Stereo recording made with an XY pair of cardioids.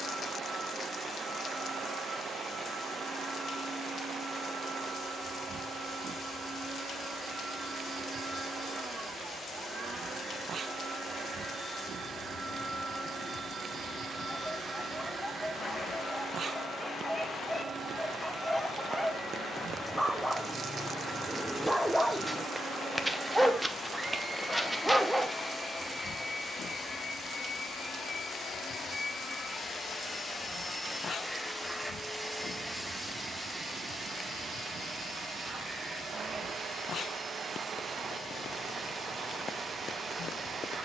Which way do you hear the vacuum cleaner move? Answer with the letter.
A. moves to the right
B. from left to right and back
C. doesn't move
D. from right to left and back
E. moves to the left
D.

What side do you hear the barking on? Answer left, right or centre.
centre.